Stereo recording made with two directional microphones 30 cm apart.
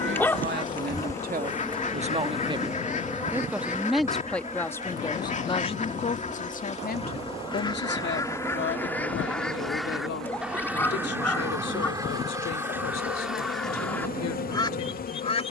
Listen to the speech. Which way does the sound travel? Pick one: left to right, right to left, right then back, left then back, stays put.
right to left.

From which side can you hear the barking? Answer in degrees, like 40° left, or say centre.
10° left.